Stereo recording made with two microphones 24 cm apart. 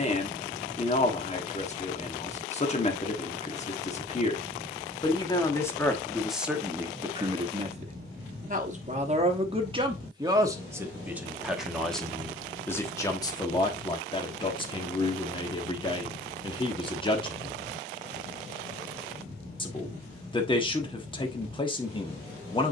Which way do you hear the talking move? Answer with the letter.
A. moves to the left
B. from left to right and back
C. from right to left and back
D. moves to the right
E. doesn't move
B.